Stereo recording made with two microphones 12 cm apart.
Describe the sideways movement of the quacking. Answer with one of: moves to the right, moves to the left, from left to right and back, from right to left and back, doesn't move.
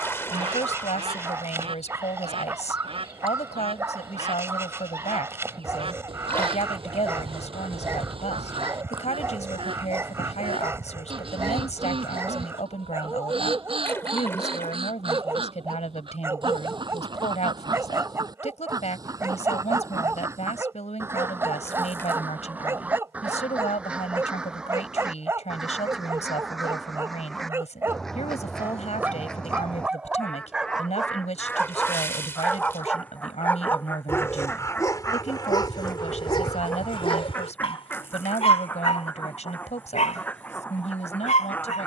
moves to the left.